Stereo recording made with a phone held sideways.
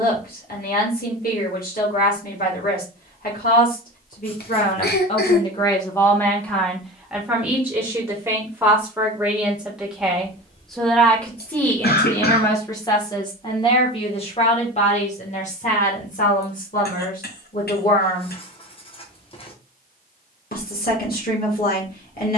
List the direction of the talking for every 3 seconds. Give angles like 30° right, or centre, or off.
70° left, 50° left, 10° right, centre, 30° left, 60° left, 70° left, 70° left.